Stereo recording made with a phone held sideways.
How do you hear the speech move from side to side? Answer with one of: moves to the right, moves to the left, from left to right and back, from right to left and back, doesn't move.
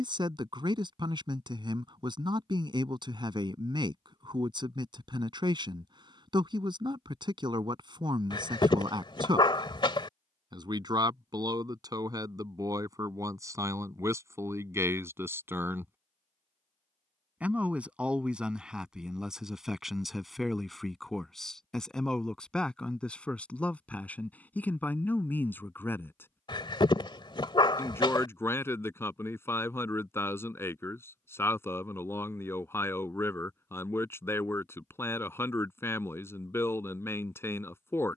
moves to the left.